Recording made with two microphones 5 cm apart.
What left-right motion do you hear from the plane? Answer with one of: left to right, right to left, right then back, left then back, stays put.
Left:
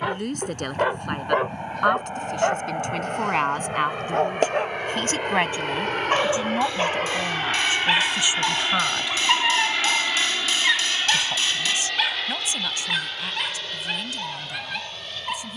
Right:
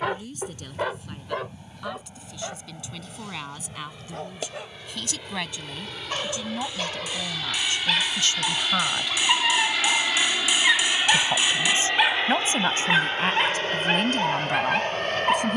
left to right.